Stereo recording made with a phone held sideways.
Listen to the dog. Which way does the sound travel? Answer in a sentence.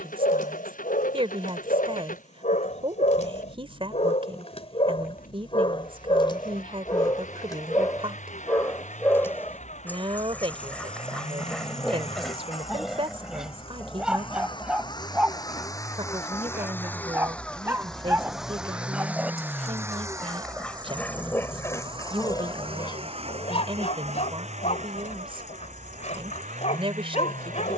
In this clip you hear the dog go right and come back.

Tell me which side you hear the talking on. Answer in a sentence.
You can hear the talking on the right.